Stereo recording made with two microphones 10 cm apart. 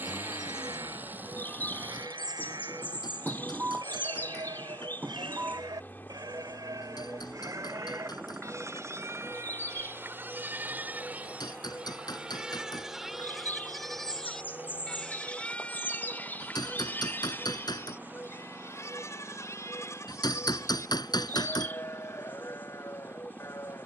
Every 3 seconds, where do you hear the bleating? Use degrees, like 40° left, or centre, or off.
50° right, 50° right, 40° right, 20° right, centre, 20° left, 30° left, 30° left.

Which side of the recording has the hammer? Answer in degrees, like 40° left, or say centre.
50° left.